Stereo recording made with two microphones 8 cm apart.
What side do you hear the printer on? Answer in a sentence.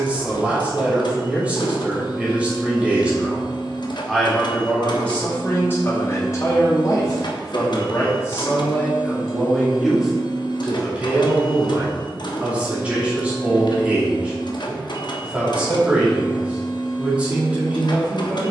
In this clip you hear the printer on the left.